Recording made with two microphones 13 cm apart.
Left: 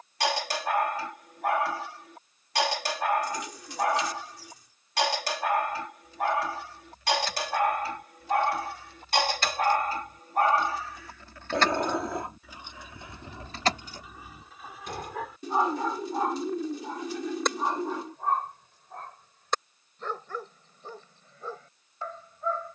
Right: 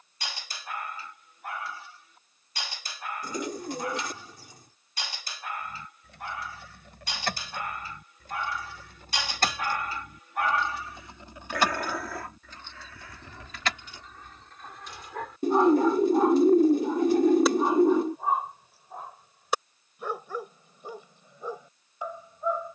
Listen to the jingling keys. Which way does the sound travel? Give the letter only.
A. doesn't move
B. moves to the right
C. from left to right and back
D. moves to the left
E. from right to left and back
D.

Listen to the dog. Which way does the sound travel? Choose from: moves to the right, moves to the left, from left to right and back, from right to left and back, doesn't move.
moves to the right.